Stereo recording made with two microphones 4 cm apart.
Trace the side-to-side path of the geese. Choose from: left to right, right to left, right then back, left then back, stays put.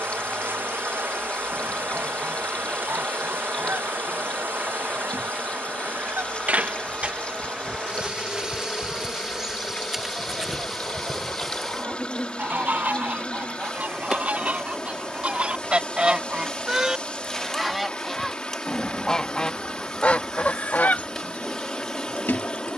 right to left.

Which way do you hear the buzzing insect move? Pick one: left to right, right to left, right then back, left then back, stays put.
right to left.